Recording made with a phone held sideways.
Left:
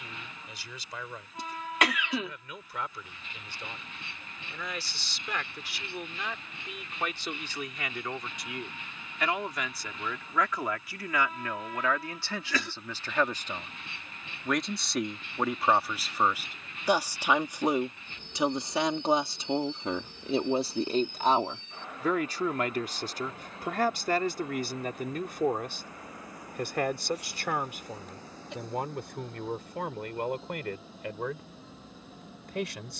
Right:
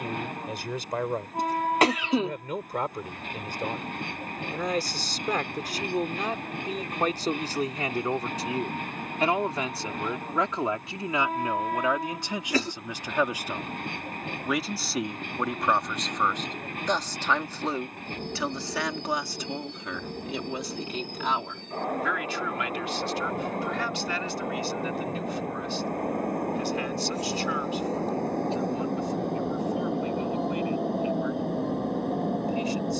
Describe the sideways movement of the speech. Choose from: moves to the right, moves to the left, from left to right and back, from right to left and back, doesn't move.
moves to the left.